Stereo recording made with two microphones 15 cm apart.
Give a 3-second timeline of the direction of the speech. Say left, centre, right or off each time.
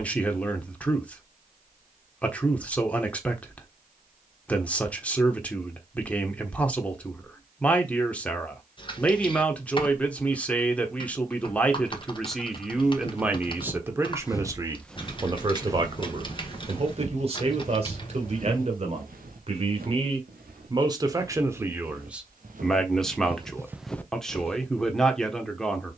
centre, centre, centre, centre, centre, right, right, centre, centre.